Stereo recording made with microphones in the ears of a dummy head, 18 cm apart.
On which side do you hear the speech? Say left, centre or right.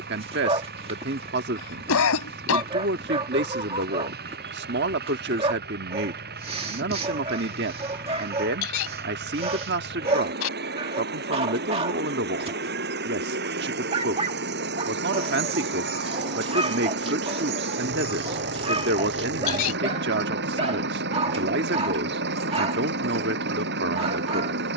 right.